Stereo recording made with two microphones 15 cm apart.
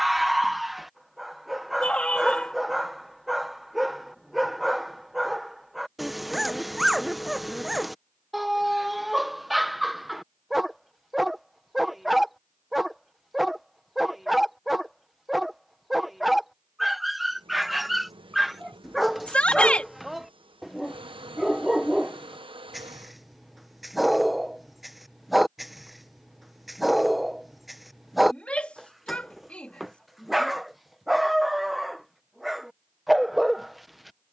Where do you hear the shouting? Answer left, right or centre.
centre.